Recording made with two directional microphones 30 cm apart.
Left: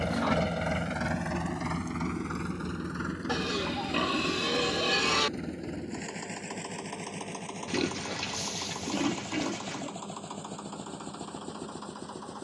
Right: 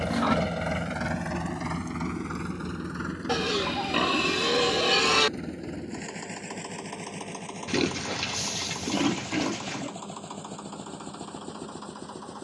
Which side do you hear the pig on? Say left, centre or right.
right.